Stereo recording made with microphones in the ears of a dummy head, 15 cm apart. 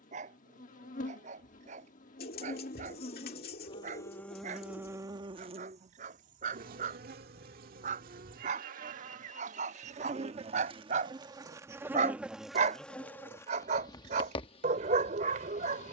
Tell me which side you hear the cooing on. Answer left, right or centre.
left.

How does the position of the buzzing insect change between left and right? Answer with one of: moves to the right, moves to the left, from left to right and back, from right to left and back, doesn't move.
from left to right and back.